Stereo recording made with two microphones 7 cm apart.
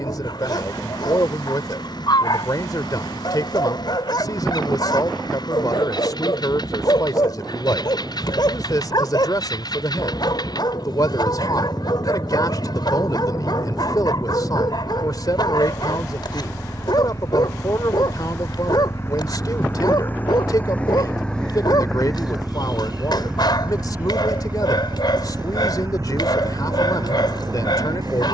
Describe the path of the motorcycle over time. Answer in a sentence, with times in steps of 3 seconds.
In this clip you hear the motorcycle on the left from 0 s, in the centre from 21 s and on the right from 24 s.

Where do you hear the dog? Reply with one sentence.
In this clip you hear the dog on the left.